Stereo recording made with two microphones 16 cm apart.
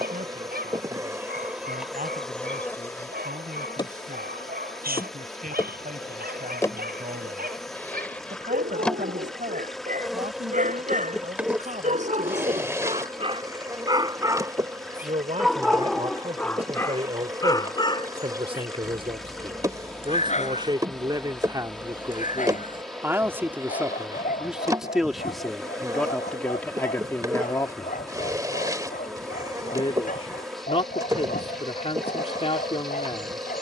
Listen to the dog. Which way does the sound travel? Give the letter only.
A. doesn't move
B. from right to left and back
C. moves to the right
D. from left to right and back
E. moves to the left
E.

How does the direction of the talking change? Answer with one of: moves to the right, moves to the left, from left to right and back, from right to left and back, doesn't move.
moves to the left.